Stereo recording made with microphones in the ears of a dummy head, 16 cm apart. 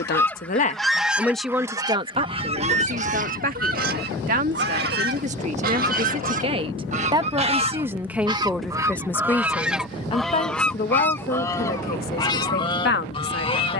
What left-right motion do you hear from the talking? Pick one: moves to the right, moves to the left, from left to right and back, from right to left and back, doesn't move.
from left to right and back.